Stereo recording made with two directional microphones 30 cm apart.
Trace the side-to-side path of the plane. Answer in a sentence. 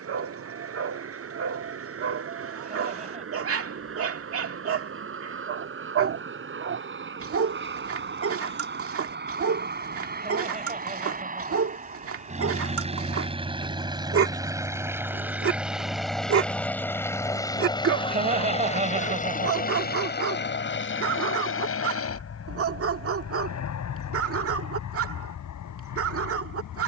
In this clip you hear the plane travel towards the left.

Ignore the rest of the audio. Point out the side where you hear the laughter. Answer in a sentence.
You can hear the laughter on the right.